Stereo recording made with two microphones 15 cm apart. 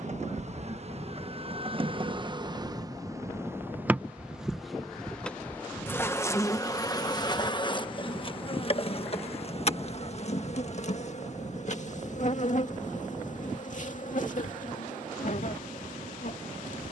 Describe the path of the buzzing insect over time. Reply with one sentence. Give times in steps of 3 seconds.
You can hear the buzzing insect on the right from 0 s, in the centre from 3 s and on the left from 6 s.